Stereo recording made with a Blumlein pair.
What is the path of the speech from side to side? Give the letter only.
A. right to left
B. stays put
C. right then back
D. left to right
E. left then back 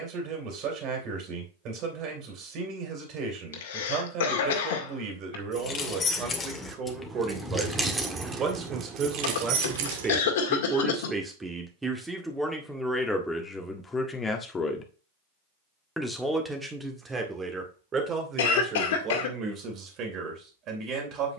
E.